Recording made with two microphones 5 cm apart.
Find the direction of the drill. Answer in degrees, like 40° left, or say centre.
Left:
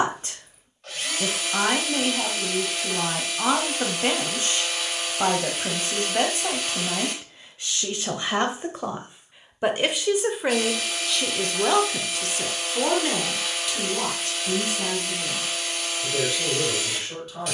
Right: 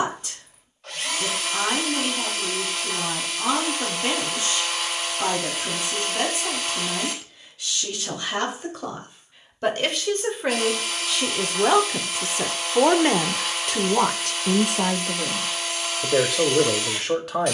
centre.